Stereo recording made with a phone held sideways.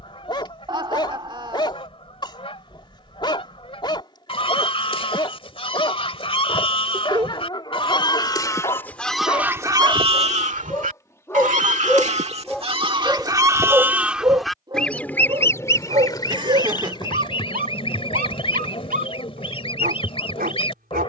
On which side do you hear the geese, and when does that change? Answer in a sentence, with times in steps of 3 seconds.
You can hear the geese on the left from 0 s, on the right from 9 s and on the left from 15 s.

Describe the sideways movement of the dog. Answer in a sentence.
You can hear the dog travel towards the right.